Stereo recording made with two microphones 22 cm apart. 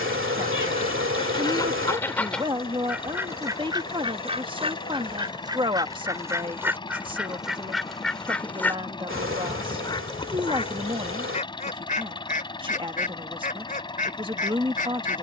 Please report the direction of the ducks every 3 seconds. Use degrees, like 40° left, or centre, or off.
10° left, 20° right, centre, 30° left, 40° left.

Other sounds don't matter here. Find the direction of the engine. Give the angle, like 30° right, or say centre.
20° left.